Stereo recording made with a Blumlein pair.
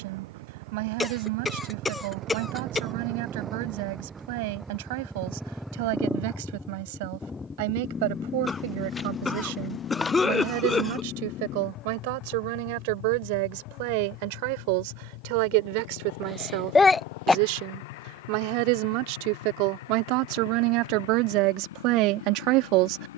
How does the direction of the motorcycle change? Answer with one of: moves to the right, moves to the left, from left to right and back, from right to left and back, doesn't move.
moves to the left.